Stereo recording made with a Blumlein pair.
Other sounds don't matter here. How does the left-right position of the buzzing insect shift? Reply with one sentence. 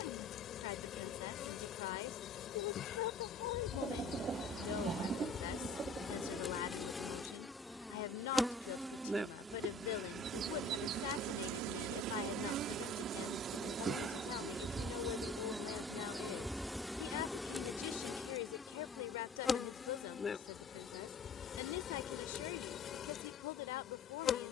You can hear the buzzing insect move from left to right and back again.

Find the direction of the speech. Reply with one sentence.
You can hear the speech on the left.